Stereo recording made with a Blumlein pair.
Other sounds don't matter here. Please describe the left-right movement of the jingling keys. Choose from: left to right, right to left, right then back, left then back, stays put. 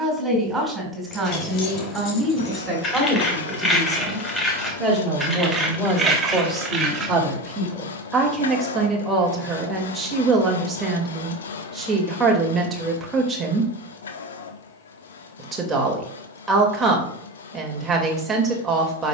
left to right.